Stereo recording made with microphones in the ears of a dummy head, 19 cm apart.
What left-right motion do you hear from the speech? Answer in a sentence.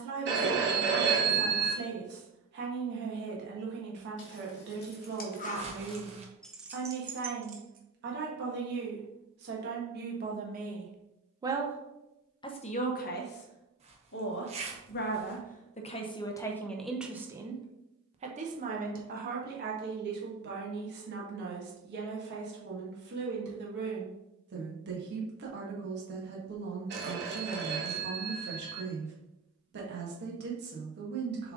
You can hear the speech move from right to left and back again.